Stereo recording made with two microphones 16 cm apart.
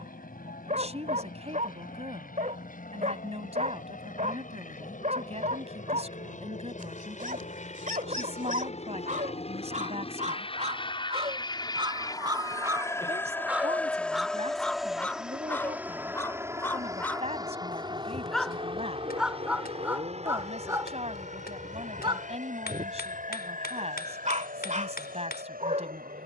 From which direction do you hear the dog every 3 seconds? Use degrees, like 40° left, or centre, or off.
50° right, 50° right, 50° right, 40° right, 10° right, 10° left, 10° right, 40° right, 50° right.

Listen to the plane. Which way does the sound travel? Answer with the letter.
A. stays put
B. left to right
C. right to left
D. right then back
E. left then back
B.